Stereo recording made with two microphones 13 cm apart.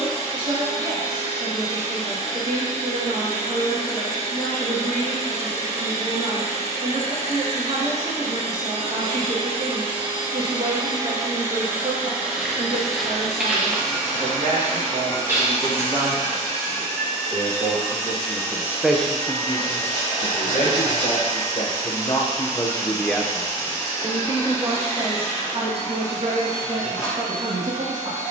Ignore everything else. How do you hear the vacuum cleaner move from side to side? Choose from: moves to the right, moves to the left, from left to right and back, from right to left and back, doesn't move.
moves to the left.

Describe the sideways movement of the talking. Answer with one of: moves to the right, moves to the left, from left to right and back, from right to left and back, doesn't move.
from right to left and back.